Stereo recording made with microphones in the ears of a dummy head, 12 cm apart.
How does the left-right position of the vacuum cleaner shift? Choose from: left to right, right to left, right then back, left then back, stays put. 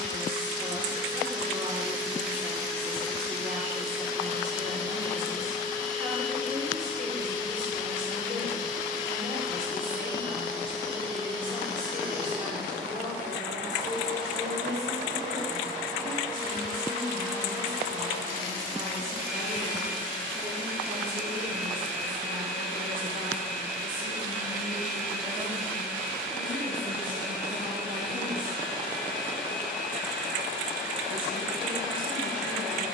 stays put.